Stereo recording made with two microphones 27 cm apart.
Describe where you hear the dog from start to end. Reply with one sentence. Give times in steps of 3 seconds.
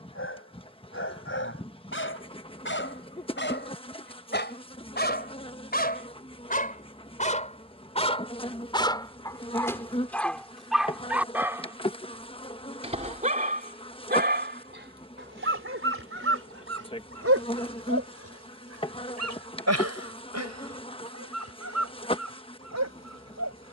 You can hear the dog on the left from 0 s, in the centre from 9 s and on the right from 12 s.